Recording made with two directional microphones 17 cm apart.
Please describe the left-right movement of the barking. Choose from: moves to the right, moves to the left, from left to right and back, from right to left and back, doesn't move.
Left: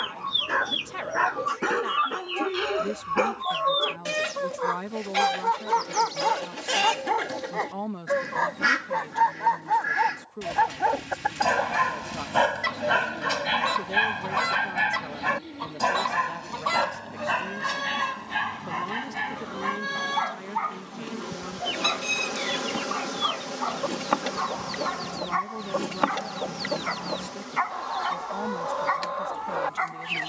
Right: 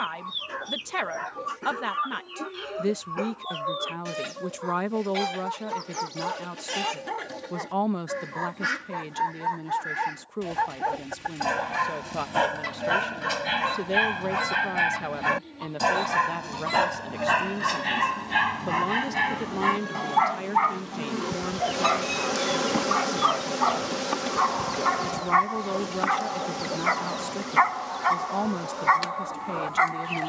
moves to the right.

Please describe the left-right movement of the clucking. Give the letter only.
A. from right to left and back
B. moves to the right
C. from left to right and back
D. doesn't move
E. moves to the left
D.